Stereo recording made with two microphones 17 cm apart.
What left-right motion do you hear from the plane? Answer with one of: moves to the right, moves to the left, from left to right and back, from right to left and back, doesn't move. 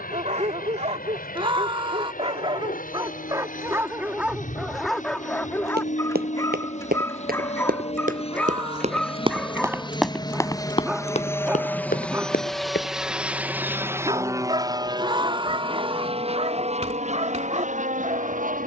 moves to the right.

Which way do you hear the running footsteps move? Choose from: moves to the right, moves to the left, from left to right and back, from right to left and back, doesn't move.
moves to the left.